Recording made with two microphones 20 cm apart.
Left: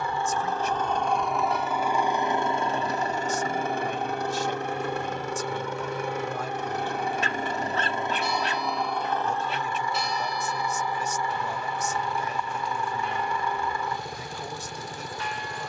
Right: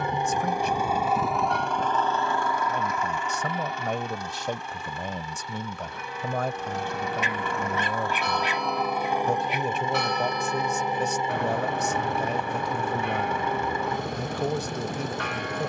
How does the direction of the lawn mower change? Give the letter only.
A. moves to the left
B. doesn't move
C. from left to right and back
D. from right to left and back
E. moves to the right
D.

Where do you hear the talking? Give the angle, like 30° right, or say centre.
60° right.